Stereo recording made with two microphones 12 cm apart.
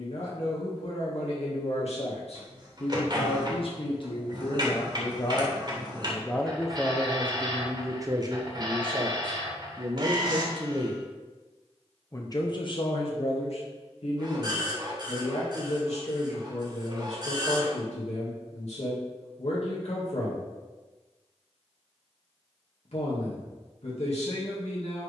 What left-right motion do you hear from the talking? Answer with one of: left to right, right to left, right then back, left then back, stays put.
right then back.